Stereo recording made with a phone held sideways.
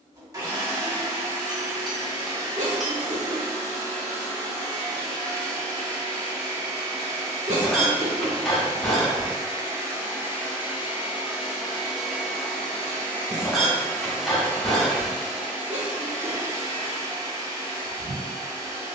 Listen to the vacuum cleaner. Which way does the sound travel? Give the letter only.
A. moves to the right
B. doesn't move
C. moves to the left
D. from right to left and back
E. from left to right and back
D.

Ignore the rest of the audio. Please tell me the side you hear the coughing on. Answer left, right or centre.
right.